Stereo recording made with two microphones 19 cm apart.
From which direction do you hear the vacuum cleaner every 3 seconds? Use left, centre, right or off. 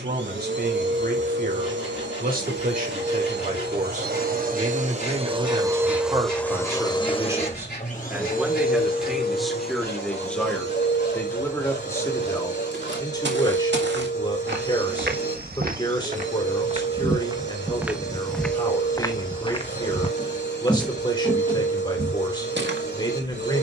right, right, left, left, left, left, left, left.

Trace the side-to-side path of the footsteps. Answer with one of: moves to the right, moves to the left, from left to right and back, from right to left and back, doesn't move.
from right to left and back.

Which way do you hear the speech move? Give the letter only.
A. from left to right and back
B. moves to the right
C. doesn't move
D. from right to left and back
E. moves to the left
E.